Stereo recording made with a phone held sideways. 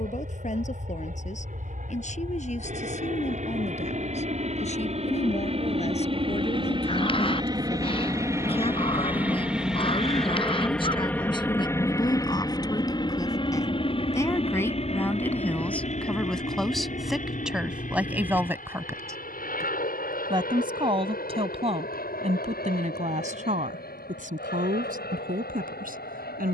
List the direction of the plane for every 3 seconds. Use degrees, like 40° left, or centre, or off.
60° right, 50° right, 30° right, centre, 30° left, 50° left, 60° left, 60° left, 70° left.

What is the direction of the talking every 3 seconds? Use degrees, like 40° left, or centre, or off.
50° left, 40° left, 40° left, 30° left, 20° left, centre, 20° right, 50° right, 60° right.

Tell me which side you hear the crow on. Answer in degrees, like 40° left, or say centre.
30° left.